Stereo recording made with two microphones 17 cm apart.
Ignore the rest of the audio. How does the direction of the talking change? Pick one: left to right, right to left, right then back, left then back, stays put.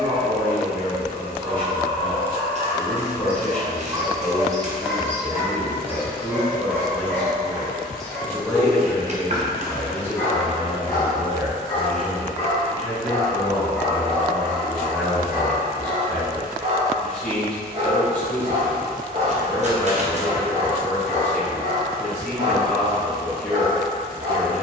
stays put.